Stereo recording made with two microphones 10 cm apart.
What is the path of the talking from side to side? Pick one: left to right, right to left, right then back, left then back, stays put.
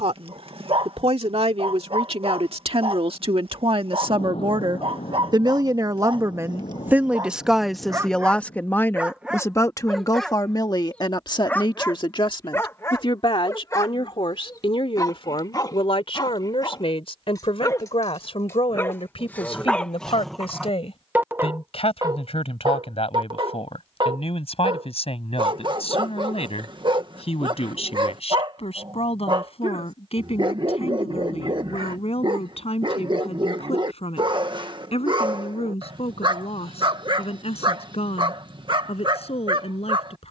right to left.